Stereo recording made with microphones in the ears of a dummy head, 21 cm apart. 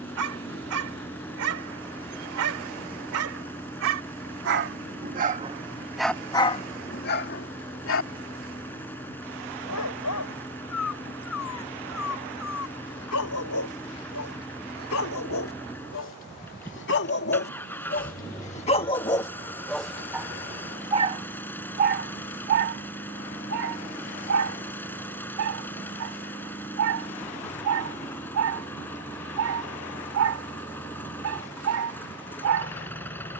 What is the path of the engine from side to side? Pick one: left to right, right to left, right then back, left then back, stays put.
stays put.